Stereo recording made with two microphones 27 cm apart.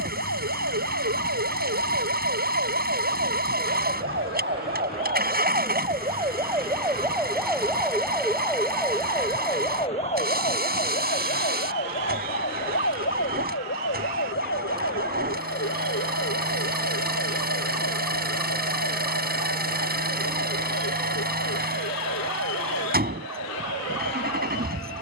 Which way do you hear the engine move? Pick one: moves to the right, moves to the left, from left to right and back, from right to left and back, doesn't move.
doesn't move.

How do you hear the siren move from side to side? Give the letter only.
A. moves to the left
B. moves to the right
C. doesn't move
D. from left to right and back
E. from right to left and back
A.